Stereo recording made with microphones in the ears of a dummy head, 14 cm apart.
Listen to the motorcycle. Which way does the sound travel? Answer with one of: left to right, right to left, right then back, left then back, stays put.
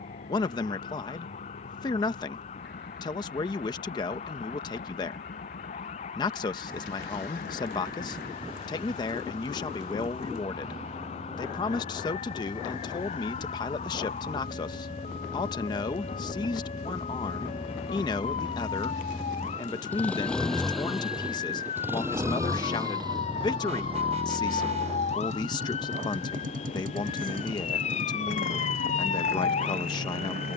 left to right.